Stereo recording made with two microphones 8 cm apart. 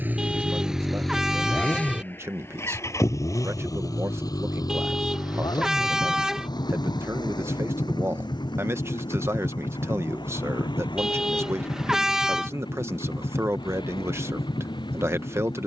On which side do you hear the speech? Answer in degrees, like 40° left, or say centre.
30° right.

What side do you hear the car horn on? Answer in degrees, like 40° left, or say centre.
10° right.